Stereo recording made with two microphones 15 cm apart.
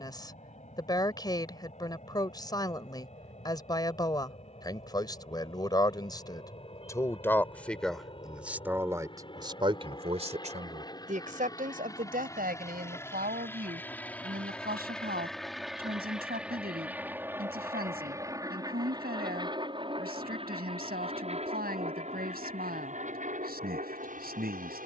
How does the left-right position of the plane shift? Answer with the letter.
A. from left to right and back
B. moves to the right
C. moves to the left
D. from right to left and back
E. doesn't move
B.